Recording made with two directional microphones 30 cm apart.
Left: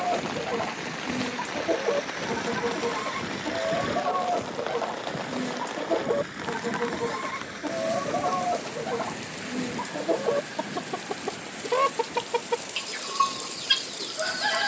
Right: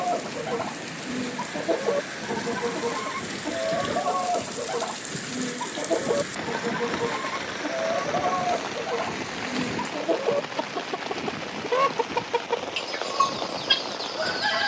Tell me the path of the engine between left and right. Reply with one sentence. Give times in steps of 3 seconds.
In this clip you hear the engine on the left from 0 s, in the centre from 3 s and on the right from 6 s.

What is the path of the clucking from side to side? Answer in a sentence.
In this clip you hear the clucking stay in one place.